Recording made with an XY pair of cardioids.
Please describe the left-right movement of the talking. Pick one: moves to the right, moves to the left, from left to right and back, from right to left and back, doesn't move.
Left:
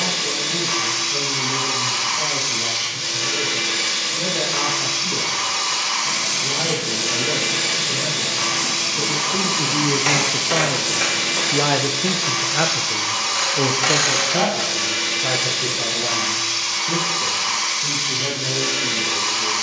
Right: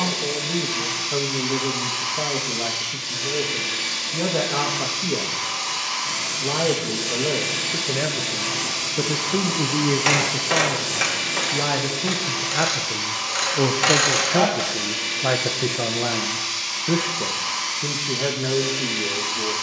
from right to left and back.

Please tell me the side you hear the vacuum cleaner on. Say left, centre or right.
left.